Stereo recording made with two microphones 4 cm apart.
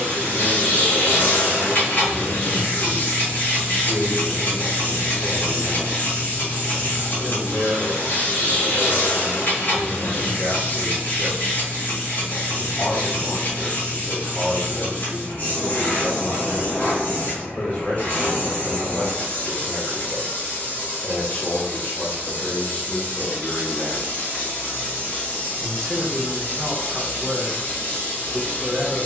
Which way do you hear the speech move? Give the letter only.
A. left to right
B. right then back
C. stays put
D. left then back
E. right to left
A.